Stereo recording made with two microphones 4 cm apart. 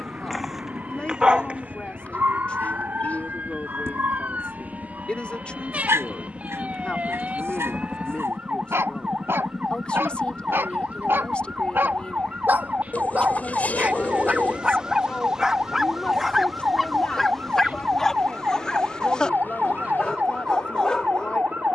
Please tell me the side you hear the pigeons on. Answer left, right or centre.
left.